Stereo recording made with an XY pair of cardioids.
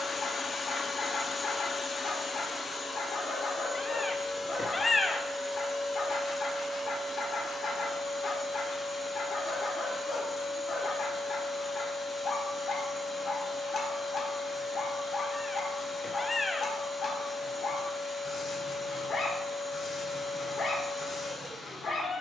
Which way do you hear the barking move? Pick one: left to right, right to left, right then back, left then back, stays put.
stays put.